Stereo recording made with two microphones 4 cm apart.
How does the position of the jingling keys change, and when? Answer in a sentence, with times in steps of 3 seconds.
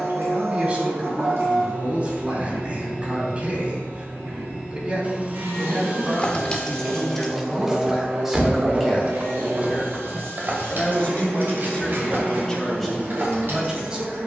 In this clip you hear the jingling keys not at all from 0 s, in the centre from 6 s and on the right from 9 s.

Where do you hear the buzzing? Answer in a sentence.
In this clip you hear the buzzing on the right.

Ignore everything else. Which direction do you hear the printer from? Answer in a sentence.
You can hear the printer on the right.